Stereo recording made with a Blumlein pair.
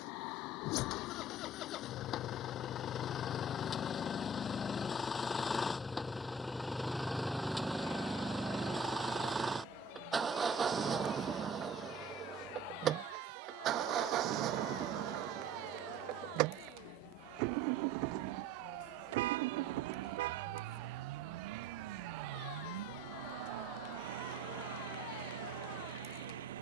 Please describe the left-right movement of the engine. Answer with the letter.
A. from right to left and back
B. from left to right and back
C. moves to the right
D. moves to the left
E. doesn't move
C.